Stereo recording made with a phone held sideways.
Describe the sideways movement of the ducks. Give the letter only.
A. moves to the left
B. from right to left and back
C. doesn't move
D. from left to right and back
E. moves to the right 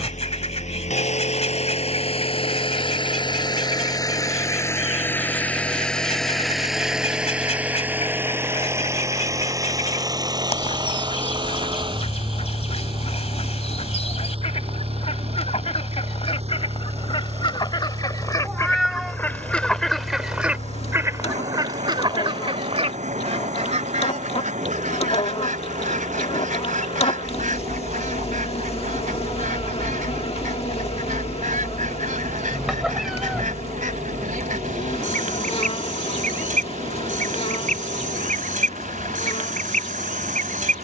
E.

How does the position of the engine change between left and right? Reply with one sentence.
In this clip you hear the engine move from left to right.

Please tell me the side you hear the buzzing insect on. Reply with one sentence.
In this clip you hear the buzzing insect on the left.